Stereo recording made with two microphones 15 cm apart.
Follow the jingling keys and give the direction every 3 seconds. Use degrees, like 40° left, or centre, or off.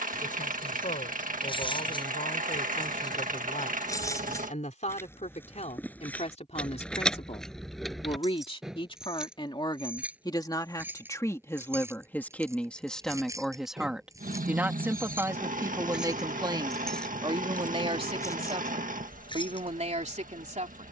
30° left, 20° left, centre, 10° right, 20° right, centre, 30° left.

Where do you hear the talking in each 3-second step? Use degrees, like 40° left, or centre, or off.
60° left, 50° left, 40° left, 30° left, centre, 30° right, 50° right.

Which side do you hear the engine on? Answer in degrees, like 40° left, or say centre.
70° right.